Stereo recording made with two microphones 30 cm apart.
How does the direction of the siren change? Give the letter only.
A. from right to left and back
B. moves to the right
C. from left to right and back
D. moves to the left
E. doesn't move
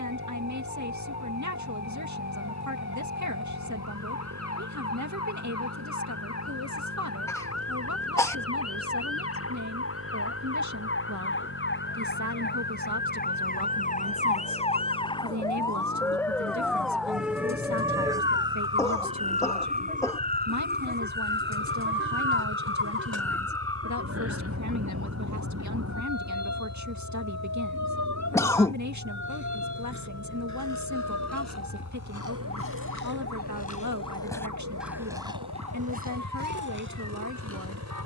B.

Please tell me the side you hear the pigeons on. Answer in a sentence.
You can hear the pigeons on the left.